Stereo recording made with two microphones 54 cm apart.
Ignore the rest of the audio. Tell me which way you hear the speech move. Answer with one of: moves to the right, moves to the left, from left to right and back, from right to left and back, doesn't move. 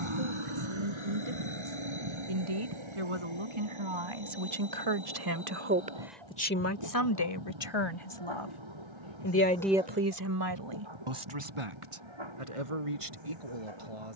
from right to left and back.